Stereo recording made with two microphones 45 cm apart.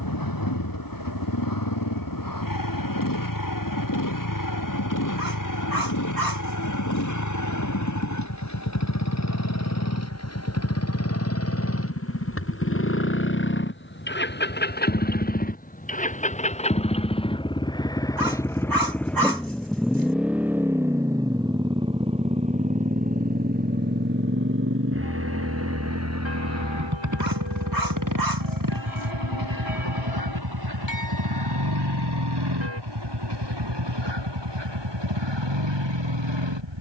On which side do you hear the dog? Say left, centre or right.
right.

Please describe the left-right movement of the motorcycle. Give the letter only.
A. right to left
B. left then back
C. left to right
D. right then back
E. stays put
C.